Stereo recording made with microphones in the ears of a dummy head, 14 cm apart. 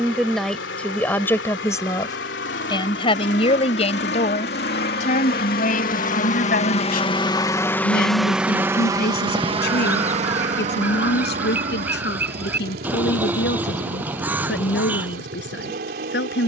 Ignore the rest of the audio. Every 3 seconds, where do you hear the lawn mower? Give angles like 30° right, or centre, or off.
80° left, 70° left, 20° left, 40° right, 60° right, 60° right.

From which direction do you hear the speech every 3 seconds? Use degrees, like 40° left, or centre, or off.
10° left, 40° left, 60° left, 70° left, 80° left, 80° left.